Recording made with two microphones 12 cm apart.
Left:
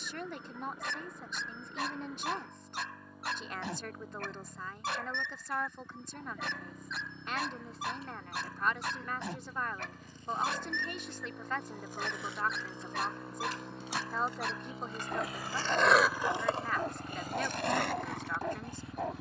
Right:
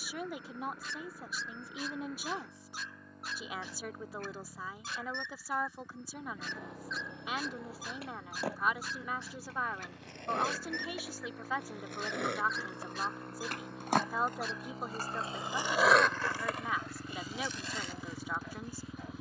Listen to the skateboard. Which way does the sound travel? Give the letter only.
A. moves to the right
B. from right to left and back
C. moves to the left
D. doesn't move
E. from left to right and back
C.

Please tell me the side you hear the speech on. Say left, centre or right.
centre.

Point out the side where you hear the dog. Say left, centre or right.
left.